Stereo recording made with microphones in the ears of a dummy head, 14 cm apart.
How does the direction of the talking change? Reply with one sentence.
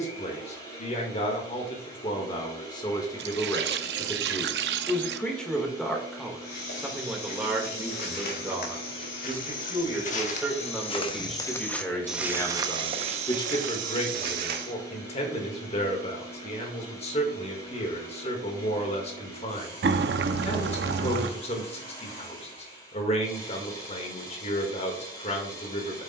In this clip you hear the talking move from left to right and back again.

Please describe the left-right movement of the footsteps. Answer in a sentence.
In this clip you hear the footsteps move from left to right.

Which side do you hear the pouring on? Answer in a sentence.
You can hear the pouring on the right.